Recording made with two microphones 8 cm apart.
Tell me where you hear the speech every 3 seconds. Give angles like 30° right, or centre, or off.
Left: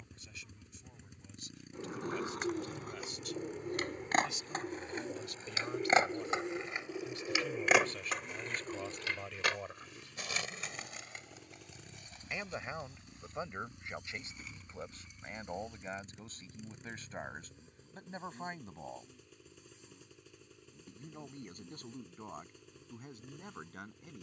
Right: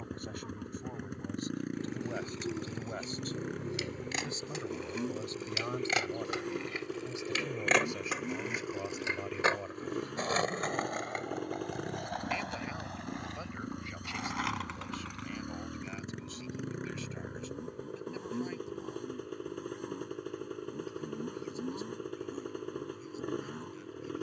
50° right, 40° right, 20° right, centre, 20° left, 40° left, 40° left, 50° left.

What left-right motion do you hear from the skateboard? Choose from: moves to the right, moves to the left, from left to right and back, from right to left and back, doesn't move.
moves to the right.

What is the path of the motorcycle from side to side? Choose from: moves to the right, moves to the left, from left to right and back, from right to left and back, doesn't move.
doesn't move.